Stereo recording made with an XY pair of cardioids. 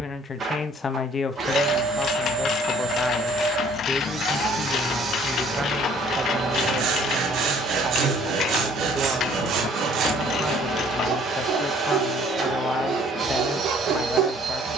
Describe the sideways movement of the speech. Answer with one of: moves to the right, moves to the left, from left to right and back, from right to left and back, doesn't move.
from left to right and back.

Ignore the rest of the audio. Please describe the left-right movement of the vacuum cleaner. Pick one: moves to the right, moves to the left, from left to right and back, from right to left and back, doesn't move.
doesn't move.